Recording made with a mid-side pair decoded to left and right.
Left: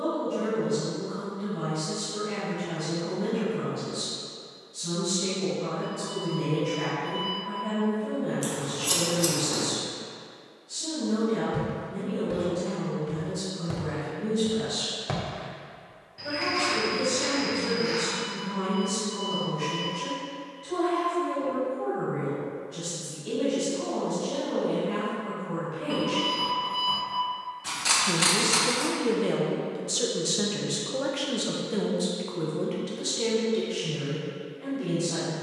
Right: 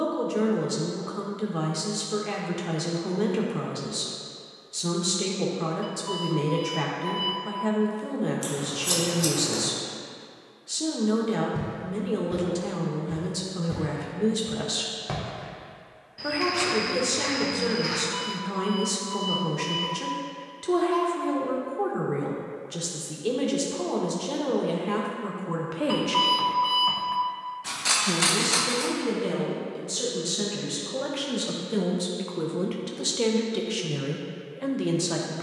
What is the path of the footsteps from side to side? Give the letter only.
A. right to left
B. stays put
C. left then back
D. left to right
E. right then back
D.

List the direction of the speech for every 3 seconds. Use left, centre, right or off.
right, right, right, right, right, right, right, right, right, centre, centre, right.